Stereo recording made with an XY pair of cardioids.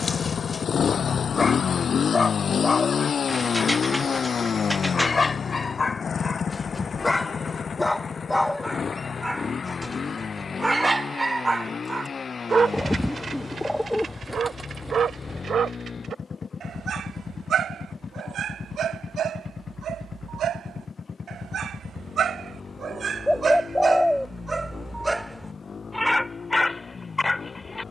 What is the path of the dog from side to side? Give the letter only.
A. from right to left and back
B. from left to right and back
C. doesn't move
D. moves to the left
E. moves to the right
B.